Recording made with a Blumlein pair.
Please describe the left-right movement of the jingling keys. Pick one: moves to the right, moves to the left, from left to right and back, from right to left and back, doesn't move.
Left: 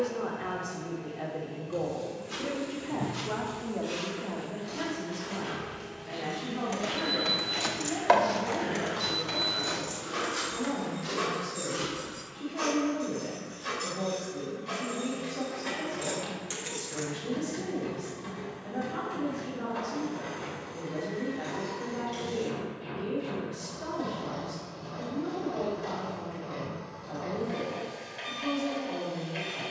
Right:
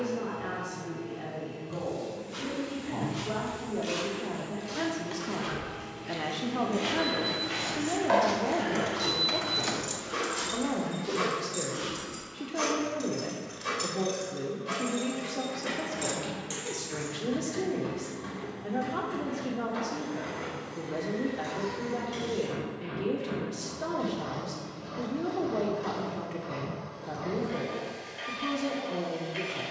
from left to right and back.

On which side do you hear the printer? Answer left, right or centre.
centre.